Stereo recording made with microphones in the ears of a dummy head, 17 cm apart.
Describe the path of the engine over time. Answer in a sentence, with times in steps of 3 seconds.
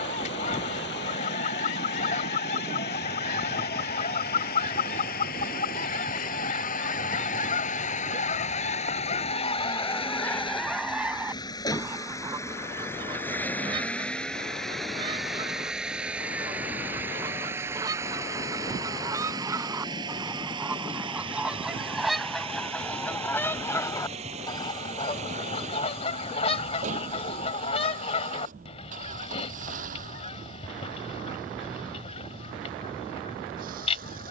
You can hear the engine on the left from 0 s, in the centre from 12 s and on the right from 18 s.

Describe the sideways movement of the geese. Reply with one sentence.
You can hear the geese move from left to right and back again.